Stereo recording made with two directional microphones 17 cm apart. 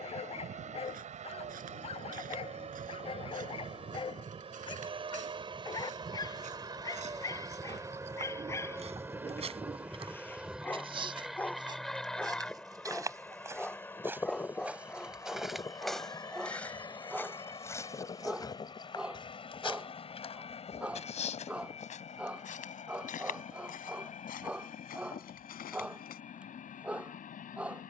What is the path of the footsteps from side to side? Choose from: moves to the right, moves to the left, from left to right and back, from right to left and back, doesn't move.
moves to the left.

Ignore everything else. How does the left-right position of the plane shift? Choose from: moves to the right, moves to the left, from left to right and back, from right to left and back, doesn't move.
moves to the left.